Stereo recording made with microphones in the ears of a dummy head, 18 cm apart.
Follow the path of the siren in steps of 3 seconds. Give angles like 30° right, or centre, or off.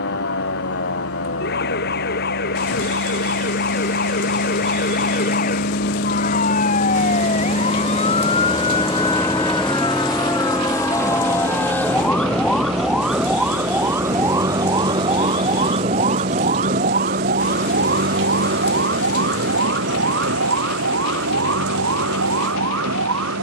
50° left, 40° left, 30° left, 20° left, 10° right, 40° right, 60° right, 70° right.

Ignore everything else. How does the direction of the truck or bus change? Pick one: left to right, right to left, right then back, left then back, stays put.
left to right.